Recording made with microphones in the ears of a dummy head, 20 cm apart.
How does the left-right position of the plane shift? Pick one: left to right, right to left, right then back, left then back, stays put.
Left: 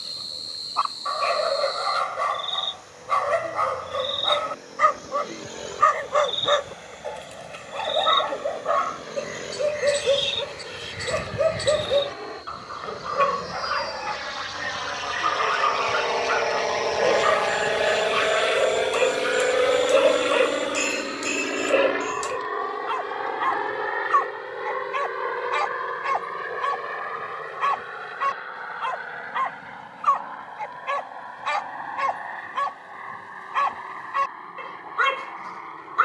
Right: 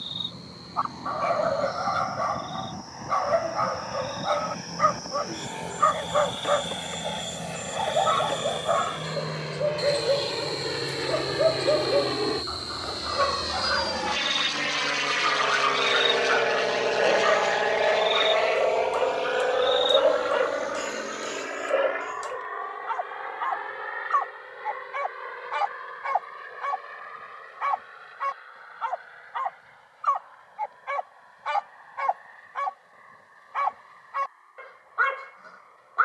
right to left.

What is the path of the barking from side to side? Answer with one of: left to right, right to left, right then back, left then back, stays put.
stays put.